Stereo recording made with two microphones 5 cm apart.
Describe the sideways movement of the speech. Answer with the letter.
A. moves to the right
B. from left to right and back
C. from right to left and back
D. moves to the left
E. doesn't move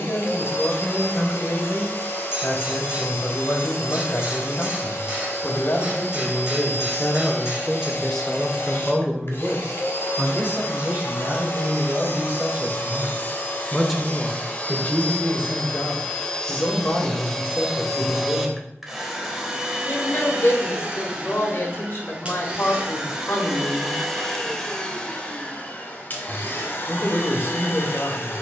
B.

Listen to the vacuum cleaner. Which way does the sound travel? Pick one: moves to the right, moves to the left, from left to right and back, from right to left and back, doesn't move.
from left to right and back.